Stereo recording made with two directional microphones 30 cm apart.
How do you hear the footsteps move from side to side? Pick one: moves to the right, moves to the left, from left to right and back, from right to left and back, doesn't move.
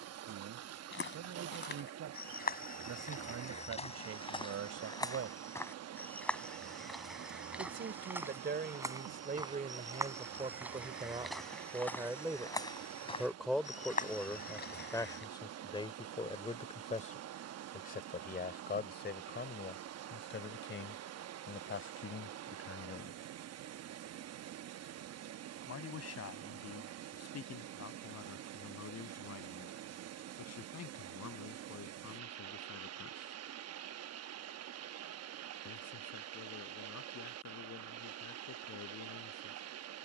from left to right and back.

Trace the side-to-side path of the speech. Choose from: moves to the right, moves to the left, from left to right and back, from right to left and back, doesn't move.
moves to the left.